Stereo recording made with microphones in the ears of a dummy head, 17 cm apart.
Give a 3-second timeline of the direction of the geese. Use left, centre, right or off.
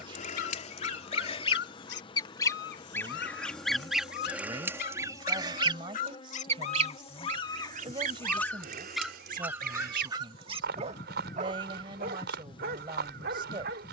left, centre, right, right, right.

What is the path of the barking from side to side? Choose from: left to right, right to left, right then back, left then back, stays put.
left to right.